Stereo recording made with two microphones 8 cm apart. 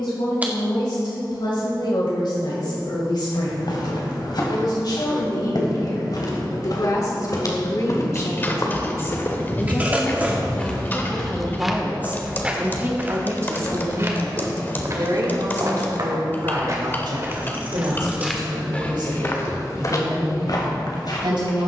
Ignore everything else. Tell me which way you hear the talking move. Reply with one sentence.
You can hear the talking move from left to right.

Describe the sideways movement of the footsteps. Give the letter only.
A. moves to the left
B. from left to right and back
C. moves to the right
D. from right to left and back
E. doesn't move
B.